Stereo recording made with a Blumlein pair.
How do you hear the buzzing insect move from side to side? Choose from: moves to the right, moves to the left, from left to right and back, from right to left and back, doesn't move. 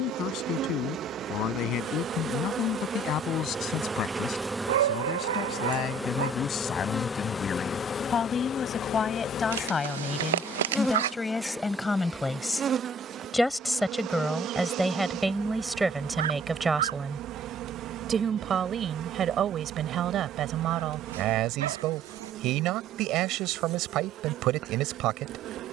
from right to left and back.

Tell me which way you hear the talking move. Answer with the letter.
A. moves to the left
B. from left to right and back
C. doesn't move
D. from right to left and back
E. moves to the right
E.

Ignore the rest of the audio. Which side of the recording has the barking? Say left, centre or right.
right.